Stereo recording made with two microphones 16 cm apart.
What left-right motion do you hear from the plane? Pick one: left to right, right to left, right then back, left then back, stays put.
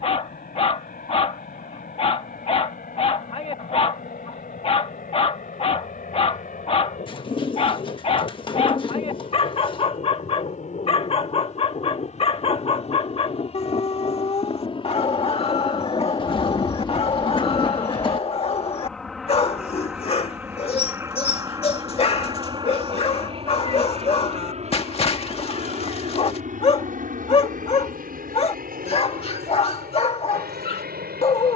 left to right.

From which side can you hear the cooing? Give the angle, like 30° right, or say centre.
30° left.